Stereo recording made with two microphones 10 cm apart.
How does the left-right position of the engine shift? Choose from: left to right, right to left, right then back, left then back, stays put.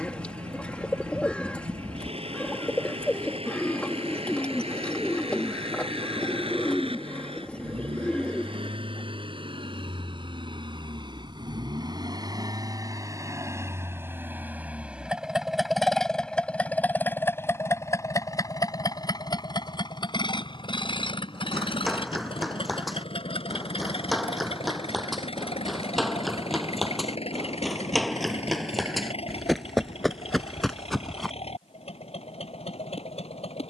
right to left.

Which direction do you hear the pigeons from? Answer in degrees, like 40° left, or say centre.
10° left.